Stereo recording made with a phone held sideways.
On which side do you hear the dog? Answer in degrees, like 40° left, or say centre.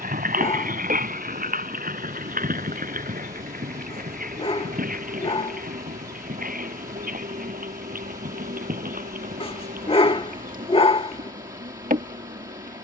40° left.